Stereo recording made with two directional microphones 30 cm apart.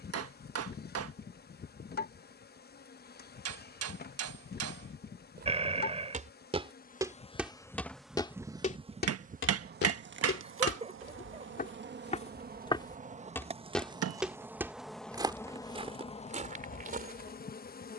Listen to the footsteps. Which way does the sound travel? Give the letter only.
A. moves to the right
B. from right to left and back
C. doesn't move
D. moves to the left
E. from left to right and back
B.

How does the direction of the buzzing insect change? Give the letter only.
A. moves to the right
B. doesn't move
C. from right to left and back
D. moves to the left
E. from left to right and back
E.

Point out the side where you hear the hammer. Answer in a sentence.
You can hear the hammer on the right.